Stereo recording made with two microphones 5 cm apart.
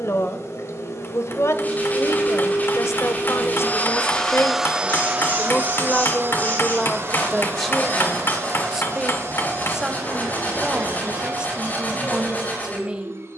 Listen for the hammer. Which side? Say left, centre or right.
left.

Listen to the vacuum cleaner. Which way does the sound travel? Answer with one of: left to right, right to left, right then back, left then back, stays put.
left to right.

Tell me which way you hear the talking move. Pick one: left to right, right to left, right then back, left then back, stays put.
left to right.